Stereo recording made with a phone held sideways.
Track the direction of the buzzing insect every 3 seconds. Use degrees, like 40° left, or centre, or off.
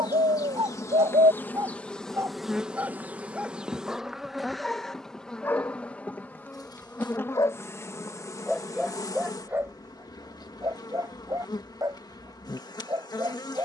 10° left, centre, 20° left, 20° left, 20° left.